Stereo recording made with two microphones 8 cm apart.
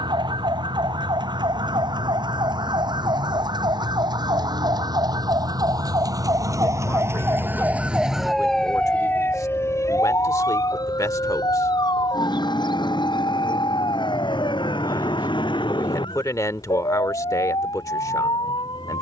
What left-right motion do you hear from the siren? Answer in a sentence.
In this clip you hear the siren go from the right side to the left.